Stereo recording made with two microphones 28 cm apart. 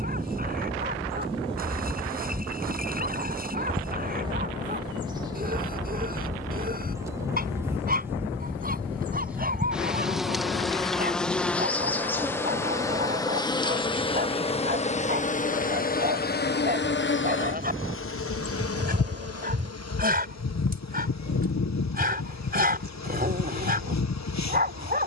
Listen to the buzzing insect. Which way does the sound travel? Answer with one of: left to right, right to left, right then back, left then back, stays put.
right to left.